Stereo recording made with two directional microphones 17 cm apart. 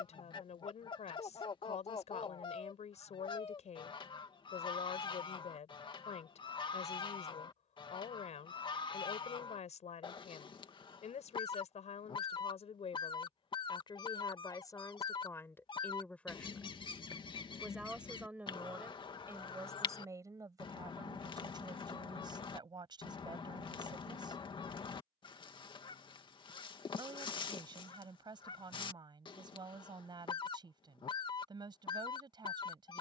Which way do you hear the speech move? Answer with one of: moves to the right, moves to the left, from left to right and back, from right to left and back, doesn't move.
moves to the right.